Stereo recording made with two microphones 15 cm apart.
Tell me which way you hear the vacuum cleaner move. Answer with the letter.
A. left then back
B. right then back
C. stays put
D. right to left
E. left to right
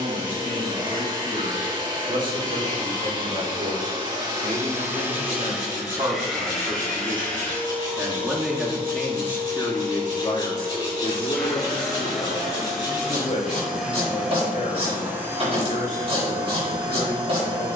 A.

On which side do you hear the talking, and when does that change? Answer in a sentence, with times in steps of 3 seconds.
You can hear the talking on the right from 0 s and on the left from 9 s.